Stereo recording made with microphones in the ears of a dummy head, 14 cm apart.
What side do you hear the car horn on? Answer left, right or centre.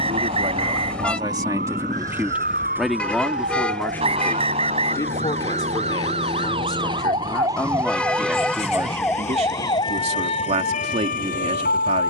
centre.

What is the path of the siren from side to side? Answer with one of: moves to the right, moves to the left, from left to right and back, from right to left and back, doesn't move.
moves to the left.